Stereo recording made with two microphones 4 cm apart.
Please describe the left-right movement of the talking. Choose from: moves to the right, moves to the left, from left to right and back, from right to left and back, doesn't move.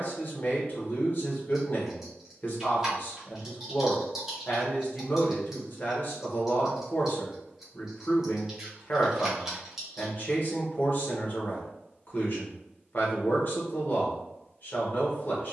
doesn't move.